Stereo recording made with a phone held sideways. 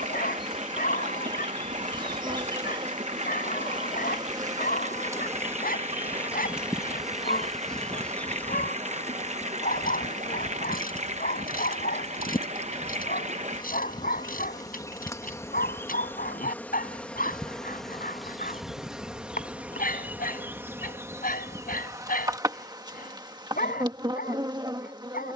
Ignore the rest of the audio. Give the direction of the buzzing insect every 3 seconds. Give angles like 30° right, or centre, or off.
30° right, 20° right, centre, 30° left, 30° left, 10° left, 10° right, 20° right, 30° right.